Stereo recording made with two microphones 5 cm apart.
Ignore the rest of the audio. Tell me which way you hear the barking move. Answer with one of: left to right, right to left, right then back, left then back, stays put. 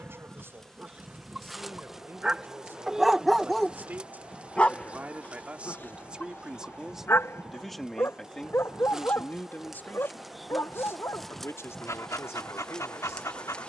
right to left.